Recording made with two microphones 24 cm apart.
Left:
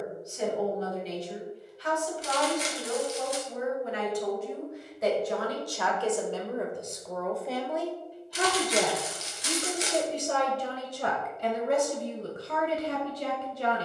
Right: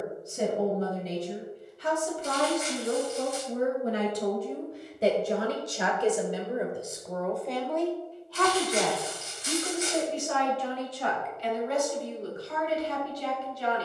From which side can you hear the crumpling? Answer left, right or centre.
left.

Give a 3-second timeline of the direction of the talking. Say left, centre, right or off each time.
right, right, centre, left, left.